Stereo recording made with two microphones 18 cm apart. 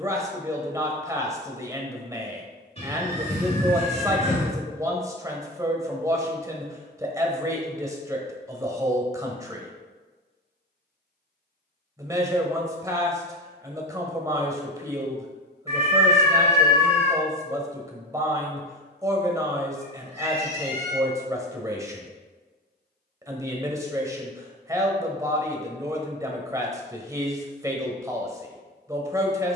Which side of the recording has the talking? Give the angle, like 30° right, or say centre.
20° right.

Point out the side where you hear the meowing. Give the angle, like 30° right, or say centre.
30° left.